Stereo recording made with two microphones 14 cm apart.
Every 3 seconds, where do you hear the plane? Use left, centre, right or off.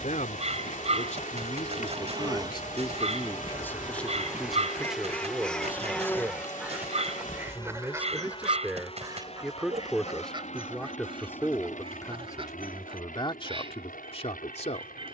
right, centre, left, left, left.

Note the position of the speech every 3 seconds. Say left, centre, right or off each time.
left, centre, centre, centre, left.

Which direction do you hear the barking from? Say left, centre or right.
right.